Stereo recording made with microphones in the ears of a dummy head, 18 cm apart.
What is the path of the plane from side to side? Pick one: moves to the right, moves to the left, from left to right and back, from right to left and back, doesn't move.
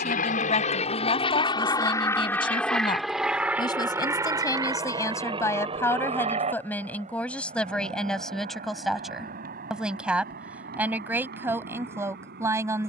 moves to the right.